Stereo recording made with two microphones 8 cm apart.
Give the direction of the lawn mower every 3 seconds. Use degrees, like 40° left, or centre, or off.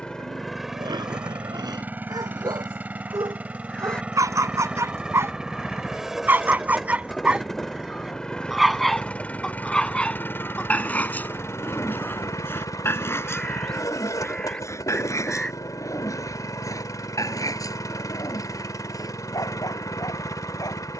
10° right, 20° right, centre, 30° left, 50° left, 50° left, 50° left.